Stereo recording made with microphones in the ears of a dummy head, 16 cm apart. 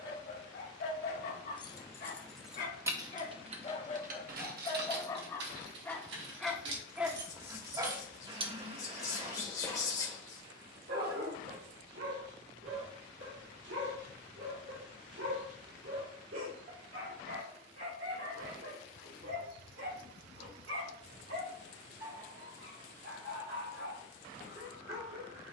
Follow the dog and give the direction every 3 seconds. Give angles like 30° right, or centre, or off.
50° left, 30° left, 20° right, 50° right, 70° right, 70° right, 80° right, 80° right, 80° right.